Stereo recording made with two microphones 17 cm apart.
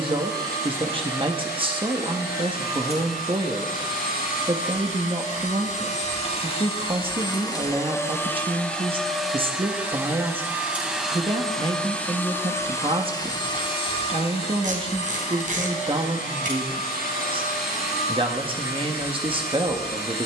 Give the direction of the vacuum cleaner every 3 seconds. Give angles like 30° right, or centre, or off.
70° left, 60° left, 20° left, centre, 30° left, 60° left, 70° left.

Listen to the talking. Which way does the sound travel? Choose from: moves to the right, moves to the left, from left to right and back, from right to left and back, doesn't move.
doesn't move.